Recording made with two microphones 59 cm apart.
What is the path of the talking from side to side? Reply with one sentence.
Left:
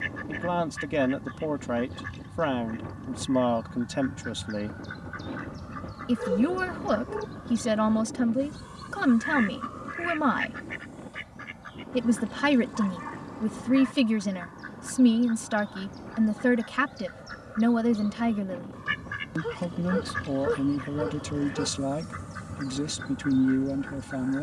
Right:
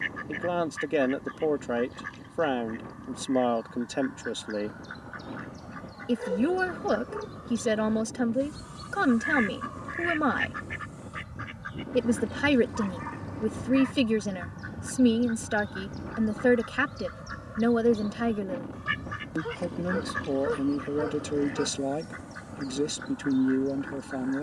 In this clip you hear the talking stay put.